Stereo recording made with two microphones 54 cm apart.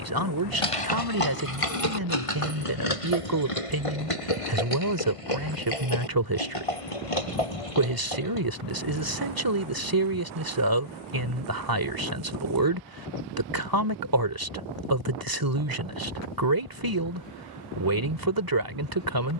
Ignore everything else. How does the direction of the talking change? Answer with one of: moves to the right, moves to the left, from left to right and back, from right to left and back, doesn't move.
doesn't move.